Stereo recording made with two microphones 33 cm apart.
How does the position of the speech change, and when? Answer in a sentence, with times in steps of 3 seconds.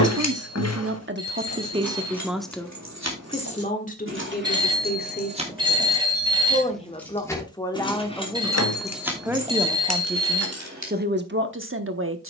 In this clip you hear the speech on the right from 0 s, on the left from 3 s, in the centre from 6 s and on the right from 9 s.